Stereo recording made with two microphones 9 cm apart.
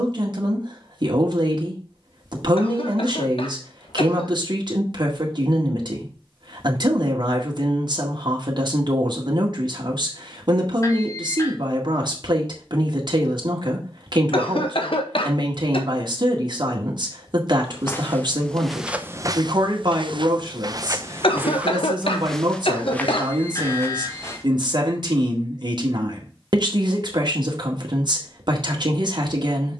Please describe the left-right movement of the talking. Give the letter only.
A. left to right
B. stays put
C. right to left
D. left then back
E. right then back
B.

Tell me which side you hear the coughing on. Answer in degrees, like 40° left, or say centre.
80° left.